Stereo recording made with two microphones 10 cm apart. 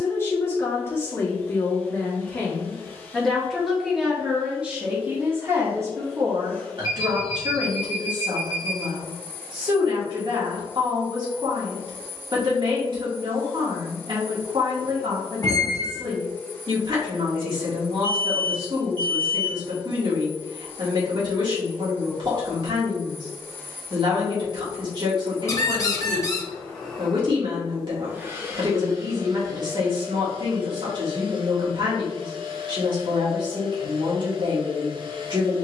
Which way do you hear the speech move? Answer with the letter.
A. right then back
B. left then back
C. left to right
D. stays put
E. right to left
C.